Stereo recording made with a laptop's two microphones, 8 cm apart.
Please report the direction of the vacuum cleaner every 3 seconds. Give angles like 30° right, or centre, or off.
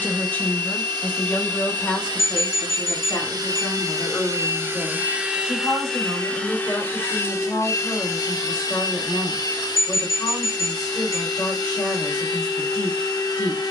70° right, 30° right, 30° left, 60° left, 60° left.